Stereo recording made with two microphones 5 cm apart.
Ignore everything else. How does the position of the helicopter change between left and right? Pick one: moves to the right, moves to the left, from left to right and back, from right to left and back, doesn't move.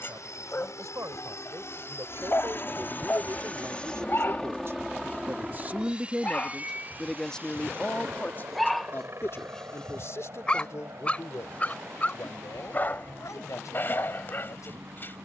moves to the right.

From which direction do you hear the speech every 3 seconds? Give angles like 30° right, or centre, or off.
70° right, 50° right, 10° left, 50° left, 70° left.